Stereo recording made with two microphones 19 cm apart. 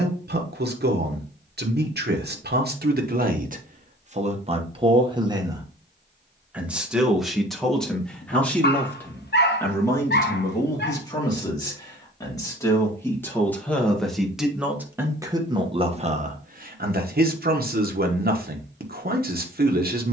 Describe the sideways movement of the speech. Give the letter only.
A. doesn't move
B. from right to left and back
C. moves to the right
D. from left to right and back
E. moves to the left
B.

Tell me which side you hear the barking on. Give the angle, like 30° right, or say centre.
60° left.